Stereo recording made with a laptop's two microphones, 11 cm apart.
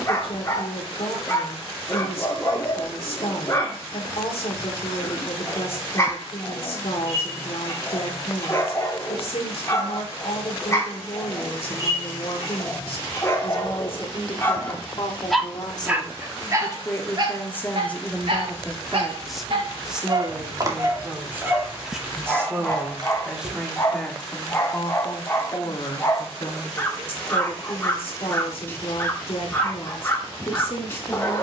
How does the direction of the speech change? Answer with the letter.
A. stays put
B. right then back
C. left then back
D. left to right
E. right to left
B.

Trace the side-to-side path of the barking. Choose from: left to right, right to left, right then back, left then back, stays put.
right then back.